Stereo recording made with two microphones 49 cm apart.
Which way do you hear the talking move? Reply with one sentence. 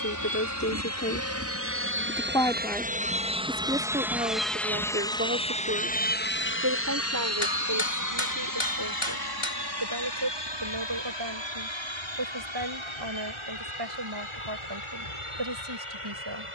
You can hear the talking move to the right.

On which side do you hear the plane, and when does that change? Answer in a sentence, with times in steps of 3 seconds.
You can hear the plane on the right from 0 s, in the centre from 3 s and on the left from 6 s.